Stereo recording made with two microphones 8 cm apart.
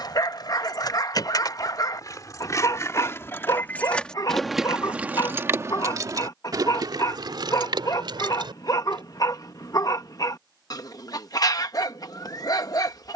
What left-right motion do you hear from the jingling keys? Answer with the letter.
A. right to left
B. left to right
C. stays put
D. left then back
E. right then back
B.